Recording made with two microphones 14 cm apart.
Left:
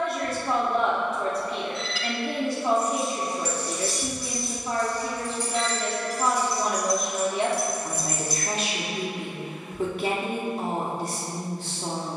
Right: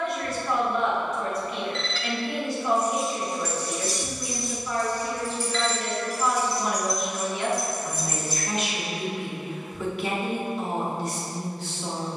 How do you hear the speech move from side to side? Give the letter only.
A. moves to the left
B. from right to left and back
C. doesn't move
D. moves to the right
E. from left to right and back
C.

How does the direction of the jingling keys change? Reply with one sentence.
You can hear the jingling keys move to the left.